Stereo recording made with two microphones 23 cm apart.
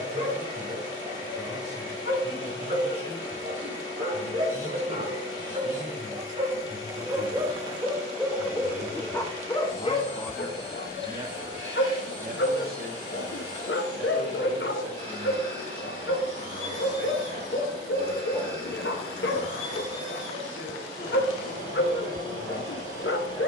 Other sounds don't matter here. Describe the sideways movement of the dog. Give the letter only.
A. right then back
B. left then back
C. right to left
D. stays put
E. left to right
C.